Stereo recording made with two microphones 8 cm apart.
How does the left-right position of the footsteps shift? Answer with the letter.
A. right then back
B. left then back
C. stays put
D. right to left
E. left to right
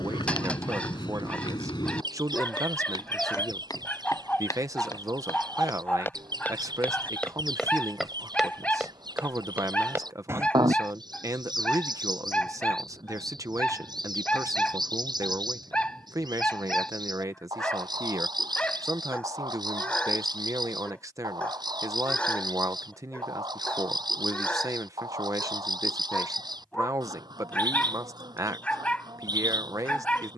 E.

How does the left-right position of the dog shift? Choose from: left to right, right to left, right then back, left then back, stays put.
stays put.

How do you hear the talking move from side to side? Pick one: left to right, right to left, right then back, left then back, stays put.
stays put.